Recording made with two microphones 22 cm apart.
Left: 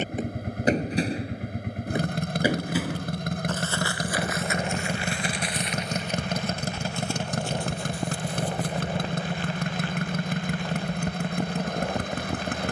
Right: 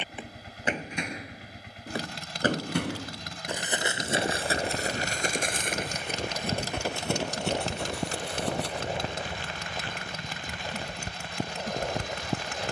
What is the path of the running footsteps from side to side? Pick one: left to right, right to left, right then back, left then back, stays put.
left to right.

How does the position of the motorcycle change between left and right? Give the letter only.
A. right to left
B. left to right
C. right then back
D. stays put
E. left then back
D.